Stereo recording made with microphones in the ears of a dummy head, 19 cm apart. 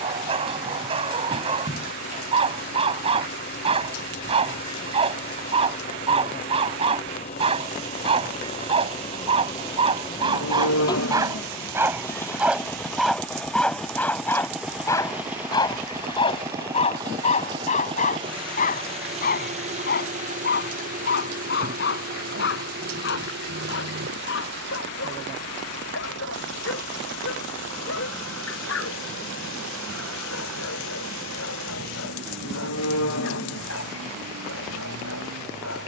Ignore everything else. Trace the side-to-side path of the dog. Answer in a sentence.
In this clip you hear the dog go from the right side to the left.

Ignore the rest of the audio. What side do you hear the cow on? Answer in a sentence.
You can hear the cow on the left.